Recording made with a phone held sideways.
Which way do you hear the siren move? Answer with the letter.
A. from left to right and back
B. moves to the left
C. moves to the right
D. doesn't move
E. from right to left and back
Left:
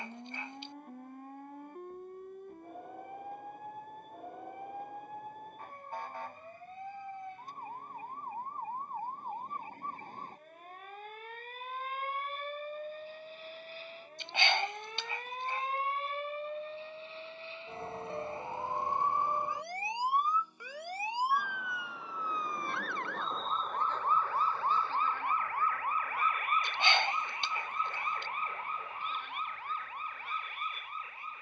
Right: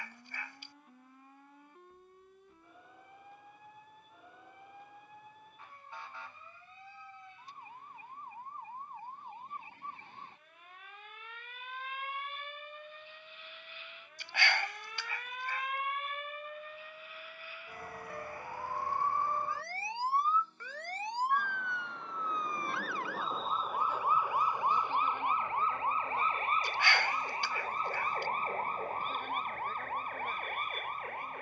C.